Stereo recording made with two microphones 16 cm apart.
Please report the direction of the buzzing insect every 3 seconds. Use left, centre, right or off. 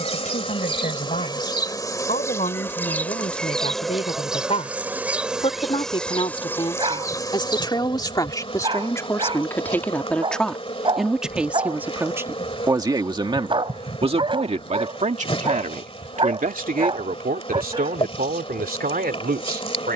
left, centre, left, left, left, left, left.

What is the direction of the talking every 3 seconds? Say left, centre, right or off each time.
left, left, left, centre, right, right, right.